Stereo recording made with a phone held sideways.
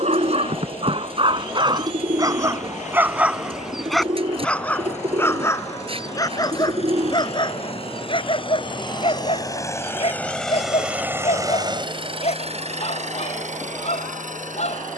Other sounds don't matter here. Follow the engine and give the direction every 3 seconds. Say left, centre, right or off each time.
left, left, left, centre, right.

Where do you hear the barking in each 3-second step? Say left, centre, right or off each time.
right, centre, left, left, left.